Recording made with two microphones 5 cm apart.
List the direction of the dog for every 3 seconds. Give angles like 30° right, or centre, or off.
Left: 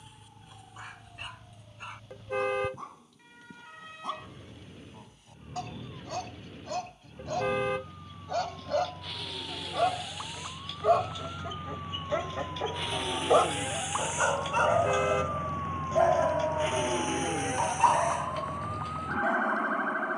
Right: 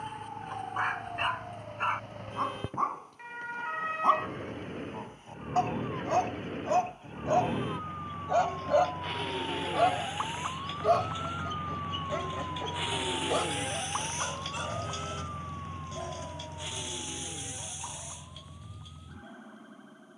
50° right, 40° right, 20° right, centre, 30° left, 60° left, 70° left.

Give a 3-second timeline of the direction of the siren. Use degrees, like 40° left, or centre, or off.
50° right, 50° right, 40° right, 20° right, centre, 40° left, 60° left.